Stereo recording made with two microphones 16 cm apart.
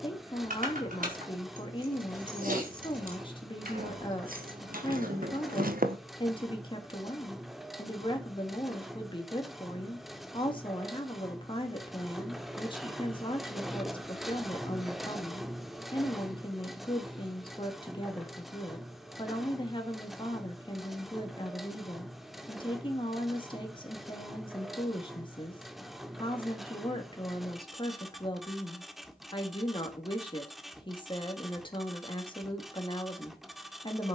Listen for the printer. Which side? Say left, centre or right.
centre.